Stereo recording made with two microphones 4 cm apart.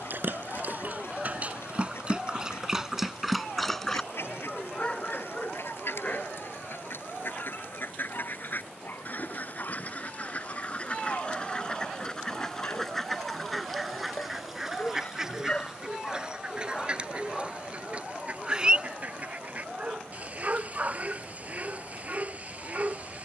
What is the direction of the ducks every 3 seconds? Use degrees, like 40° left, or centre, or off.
80° left, 70° left, 60° left, 40° left, 10° left, 20° right, 30° right, 30° right.